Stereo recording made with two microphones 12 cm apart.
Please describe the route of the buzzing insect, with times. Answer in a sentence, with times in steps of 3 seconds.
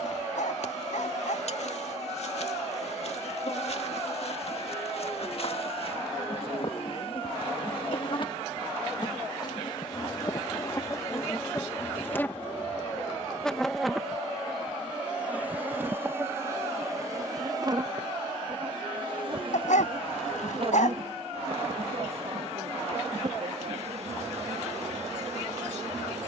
In this clip you hear the buzzing insect on the left from 0 s, in the centre from 12 s and on the right from 15 s.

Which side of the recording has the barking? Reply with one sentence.
In this clip you hear the barking on the left.